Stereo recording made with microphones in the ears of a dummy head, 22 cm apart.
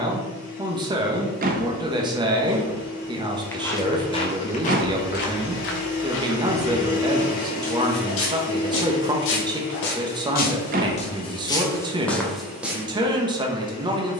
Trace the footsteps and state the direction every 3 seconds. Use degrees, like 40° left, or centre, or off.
10° right, 30° left, 60° left, 40° left, centre.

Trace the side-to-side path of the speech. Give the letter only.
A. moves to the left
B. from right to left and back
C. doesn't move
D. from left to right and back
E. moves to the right
C.